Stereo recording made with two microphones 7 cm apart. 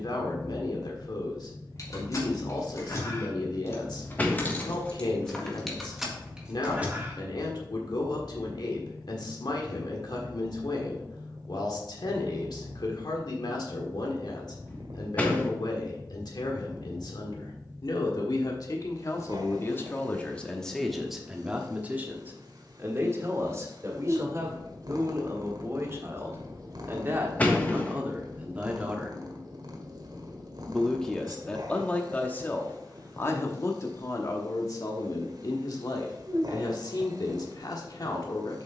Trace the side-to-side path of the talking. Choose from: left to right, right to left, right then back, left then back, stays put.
right then back.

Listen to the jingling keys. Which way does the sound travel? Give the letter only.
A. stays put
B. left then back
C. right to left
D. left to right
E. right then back
D.